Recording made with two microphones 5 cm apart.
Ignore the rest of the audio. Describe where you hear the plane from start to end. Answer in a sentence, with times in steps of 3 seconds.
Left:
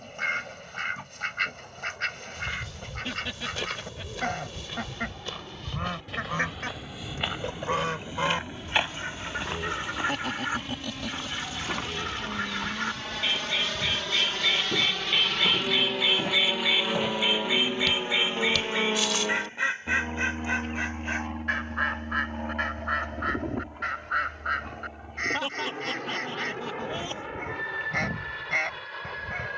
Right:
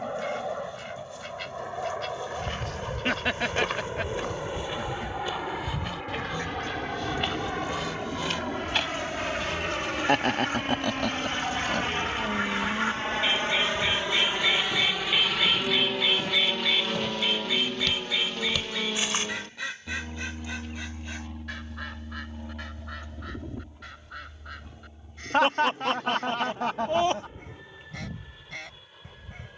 In this clip you hear the plane on the right from 0 s, in the centre from 15 s and on the left from 18 s.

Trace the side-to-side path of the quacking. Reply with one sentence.
In this clip you hear the quacking move from left to right and back again.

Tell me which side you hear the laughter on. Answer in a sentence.
In this clip you hear the laughter on the right.